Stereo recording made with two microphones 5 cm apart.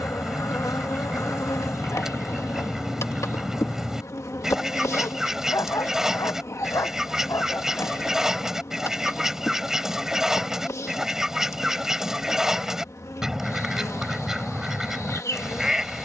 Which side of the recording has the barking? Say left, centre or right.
left.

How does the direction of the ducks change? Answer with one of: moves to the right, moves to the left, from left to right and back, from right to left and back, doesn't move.
doesn't move.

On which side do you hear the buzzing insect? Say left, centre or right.
left.